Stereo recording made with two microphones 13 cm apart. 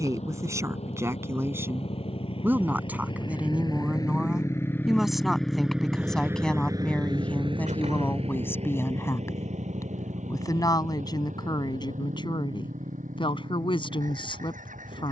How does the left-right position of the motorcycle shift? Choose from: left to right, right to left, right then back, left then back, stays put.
left to right.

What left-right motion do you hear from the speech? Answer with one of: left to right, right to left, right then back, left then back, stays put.
right to left.